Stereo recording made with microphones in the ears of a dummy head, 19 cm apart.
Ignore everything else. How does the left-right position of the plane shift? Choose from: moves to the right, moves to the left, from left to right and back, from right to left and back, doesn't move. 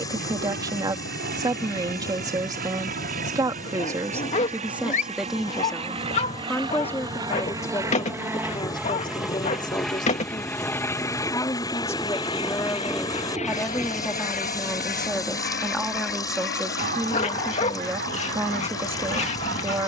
moves to the left.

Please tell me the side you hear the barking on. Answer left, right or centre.
left.